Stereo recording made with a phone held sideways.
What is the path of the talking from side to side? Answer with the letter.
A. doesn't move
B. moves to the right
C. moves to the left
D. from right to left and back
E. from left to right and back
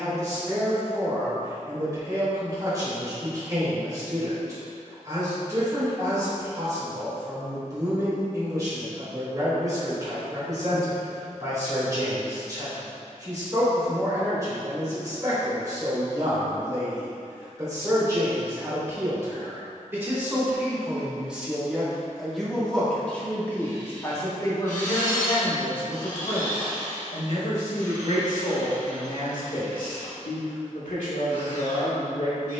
C.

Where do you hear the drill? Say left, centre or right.
left.